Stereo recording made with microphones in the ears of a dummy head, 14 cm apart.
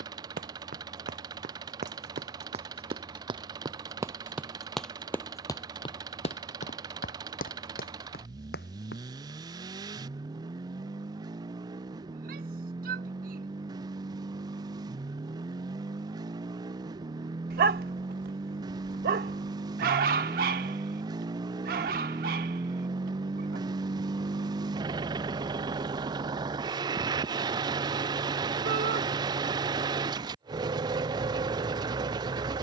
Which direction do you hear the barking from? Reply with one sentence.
In this clip you hear the barking on the right.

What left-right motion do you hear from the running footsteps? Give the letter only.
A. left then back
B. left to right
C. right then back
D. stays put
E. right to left
E.